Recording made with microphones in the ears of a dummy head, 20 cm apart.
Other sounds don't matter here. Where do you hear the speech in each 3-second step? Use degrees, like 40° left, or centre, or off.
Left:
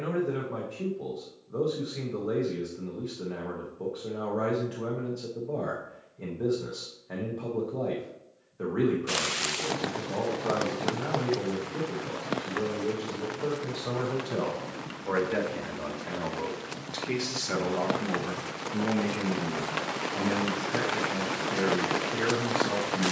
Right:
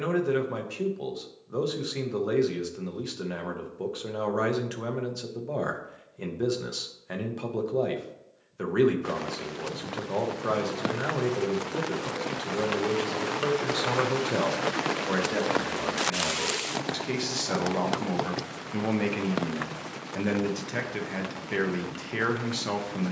70° right, 70° right, 70° right, 70° right, 60° right, centre, 40° right, 60° right.